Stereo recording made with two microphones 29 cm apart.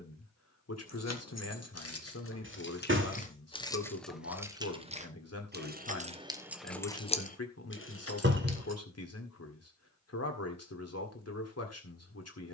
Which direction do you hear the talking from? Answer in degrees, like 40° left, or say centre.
60° left.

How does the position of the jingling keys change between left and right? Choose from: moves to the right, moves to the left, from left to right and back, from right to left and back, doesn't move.
from left to right and back.